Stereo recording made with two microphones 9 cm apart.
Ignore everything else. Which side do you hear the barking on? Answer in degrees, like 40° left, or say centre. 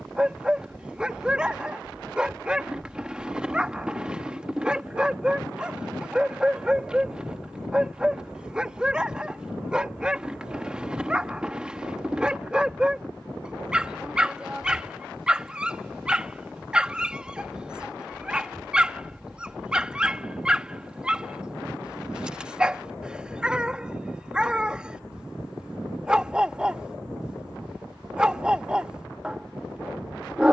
10° right.